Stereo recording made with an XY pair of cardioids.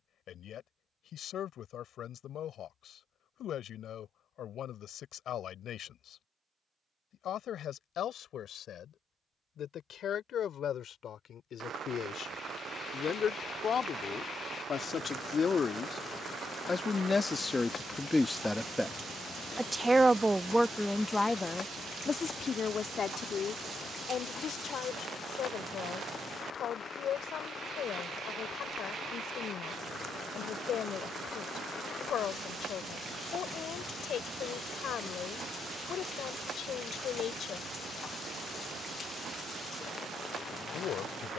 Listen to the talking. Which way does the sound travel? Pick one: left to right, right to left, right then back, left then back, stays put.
right then back.